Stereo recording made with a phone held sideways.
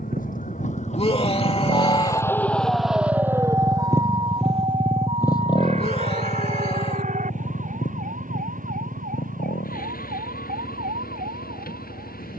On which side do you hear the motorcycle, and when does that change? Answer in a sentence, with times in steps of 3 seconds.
In this clip you hear the motorcycle on the right from 0 s, in the centre from 3 s and on the left from 6 s.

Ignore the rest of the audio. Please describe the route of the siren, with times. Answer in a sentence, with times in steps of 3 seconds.
In this clip you hear the siren on the left from 0 s and on the right from 3 s.